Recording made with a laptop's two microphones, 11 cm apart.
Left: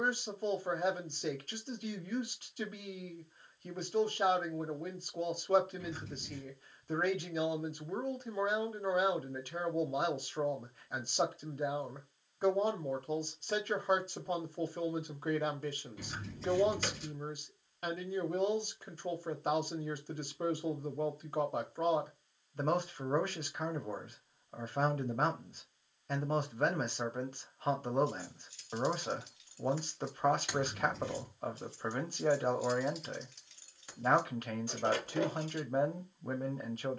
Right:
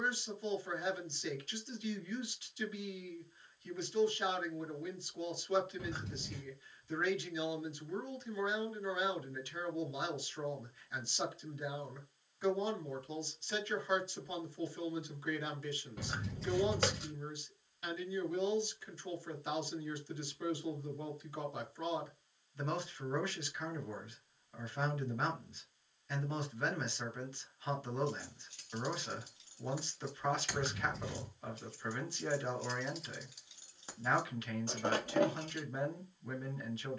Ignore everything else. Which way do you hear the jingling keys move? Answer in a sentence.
In this clip you hear the jingling keys go left and come back.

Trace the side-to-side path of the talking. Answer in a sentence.
You can hear the talking stay in one place.